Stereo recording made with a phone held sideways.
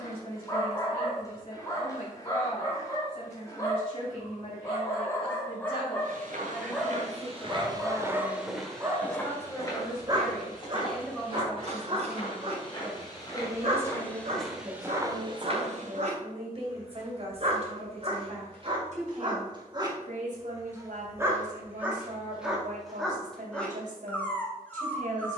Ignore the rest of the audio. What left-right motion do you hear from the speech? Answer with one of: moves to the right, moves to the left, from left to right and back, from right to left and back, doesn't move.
moves to the right.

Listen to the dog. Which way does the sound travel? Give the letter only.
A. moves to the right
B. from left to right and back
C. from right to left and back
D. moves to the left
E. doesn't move
B.